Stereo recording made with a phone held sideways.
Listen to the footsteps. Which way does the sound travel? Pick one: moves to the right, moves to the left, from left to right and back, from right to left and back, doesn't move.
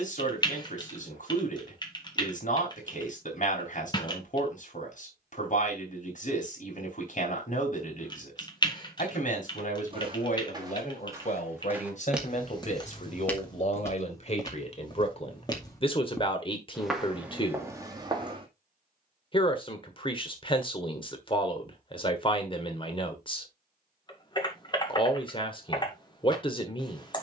from right to left and back.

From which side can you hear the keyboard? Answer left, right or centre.
left.